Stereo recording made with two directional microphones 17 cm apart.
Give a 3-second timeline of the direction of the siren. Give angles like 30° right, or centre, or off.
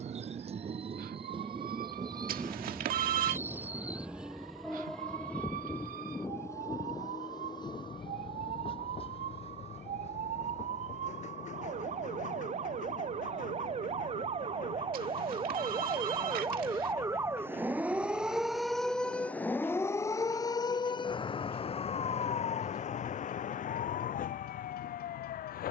70° right, 60° right, 60° right, 50° right, 40° right, 20° right, 10° left, 40° left, 60° left.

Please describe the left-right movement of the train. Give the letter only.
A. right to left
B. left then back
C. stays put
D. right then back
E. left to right
A.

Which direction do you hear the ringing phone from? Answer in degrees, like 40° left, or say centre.
70° right.